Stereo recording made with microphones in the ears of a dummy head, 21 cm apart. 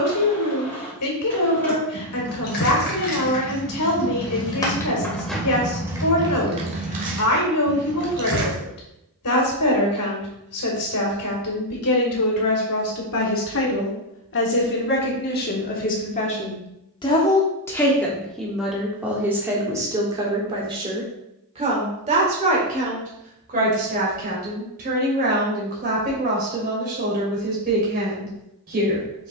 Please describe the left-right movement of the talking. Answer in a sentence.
You can hear the talking go from the left side to the right.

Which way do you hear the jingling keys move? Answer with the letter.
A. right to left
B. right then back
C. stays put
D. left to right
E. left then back
D.